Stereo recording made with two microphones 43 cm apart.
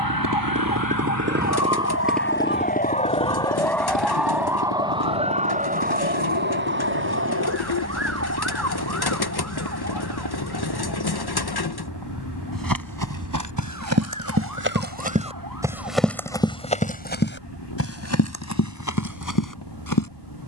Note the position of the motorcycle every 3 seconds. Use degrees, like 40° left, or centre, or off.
20° right, 50° left, 60° left, 70° left, 70° left, 70° left, 80° left.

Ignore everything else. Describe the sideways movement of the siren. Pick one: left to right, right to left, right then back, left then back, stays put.
left to right.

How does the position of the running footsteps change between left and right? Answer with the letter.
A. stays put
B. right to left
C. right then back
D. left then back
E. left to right
B.